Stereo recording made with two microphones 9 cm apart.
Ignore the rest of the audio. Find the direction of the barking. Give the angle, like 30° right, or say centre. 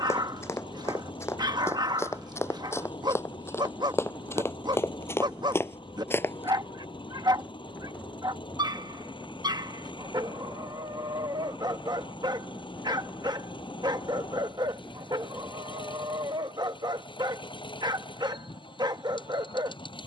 60° right.